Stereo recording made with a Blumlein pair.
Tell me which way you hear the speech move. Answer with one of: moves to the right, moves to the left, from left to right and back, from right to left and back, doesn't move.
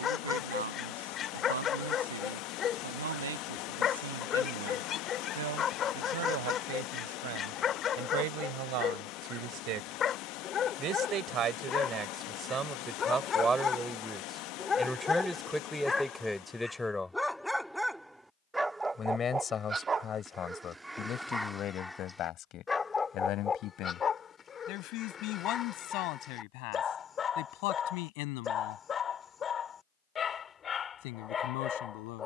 moves to the left.